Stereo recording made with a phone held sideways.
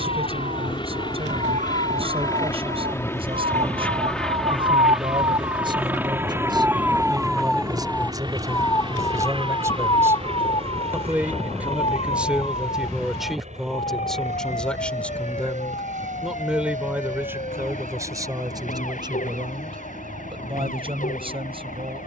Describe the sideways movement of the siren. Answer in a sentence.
You can hear the siren move from right to left.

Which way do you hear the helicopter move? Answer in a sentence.
In this clip you hear the helicopter go from the left side to the right.